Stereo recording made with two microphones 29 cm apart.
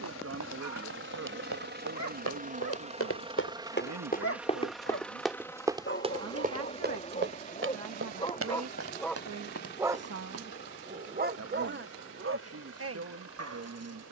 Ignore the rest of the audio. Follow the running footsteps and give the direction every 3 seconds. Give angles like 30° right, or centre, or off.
70° left, 20° left, 40° right, 60° right, off.